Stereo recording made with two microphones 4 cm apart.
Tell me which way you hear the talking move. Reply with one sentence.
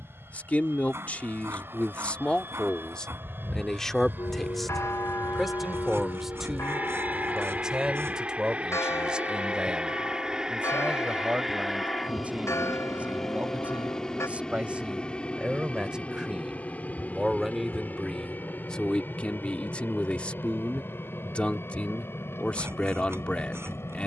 In this clip you hear the talking move from left to right and back again.